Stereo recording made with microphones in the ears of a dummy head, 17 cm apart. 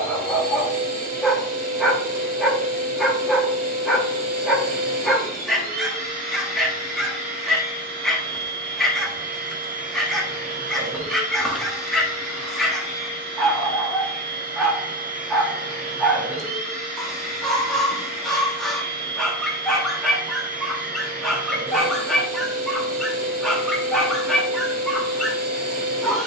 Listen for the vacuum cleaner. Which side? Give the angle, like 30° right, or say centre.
40° right.